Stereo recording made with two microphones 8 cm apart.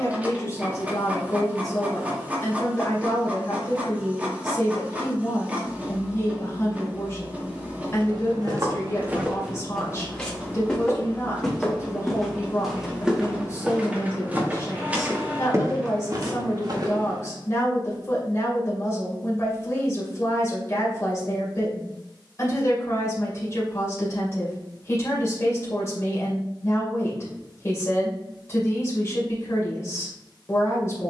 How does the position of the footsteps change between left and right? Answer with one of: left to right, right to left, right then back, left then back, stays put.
left then back.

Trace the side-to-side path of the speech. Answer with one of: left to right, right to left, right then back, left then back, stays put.
stays put.